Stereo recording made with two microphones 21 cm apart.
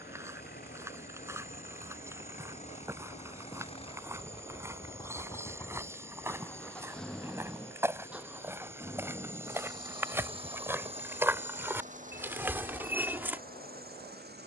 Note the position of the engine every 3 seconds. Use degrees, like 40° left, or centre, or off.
40° left, 20° left, centre, 30° right, 40° right.